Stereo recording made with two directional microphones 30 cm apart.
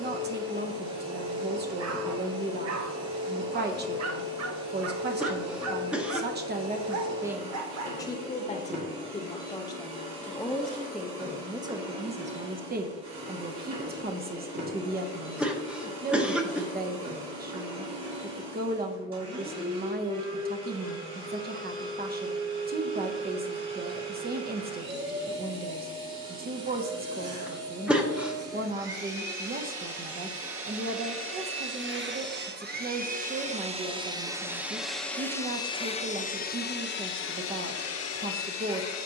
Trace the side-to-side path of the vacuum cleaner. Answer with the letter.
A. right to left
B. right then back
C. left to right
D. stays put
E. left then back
A.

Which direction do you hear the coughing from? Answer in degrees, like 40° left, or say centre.
centre.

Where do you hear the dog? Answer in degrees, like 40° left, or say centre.
60° right.